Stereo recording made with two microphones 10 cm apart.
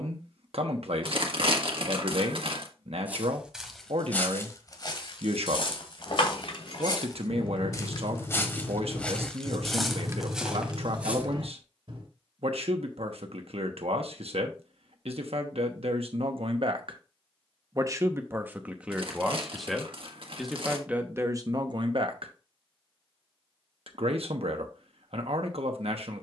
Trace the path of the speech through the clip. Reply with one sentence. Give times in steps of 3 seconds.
In this clip you hear the speech on the right from 0 s, in the centre from 18 s and on the right from 21 s.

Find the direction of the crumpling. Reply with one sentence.
In this clip you hear the crumpling on the right.